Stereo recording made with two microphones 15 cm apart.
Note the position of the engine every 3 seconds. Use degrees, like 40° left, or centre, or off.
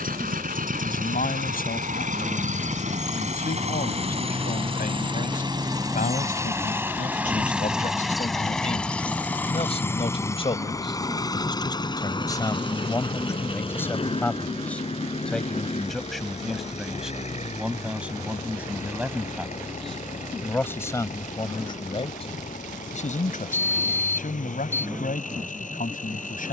60° right, 40° right, 10° right, 20° left, 40° left, 50° left, 50° left, 60° left, 60° left.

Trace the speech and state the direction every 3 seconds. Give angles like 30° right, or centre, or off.
70° left, 70° left, 60° left, 40° left, 20° left, centre, centre, 40° left, 70° left.